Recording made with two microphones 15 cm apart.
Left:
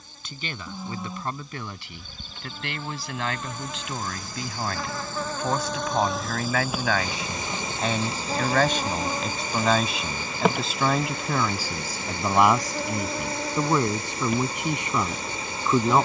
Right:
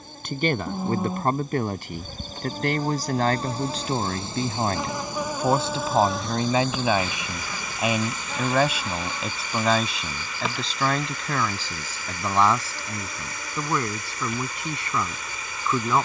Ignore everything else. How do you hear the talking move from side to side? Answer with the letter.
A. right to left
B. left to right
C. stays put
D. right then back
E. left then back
A.